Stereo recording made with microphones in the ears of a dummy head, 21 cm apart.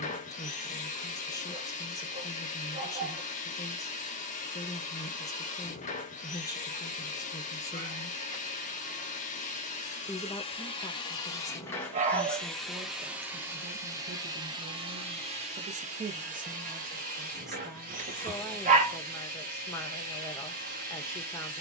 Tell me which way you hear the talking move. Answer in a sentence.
In this clip you hear the talking go right and come back.